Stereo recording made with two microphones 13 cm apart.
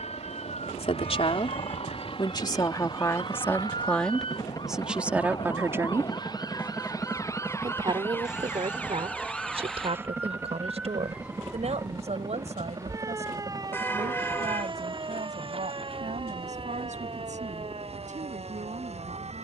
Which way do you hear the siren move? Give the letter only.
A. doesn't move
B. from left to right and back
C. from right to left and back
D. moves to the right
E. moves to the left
D.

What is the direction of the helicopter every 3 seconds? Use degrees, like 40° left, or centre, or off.
40° left, 30° left, centre, 20° right, 40° right, 50° right, 50° right.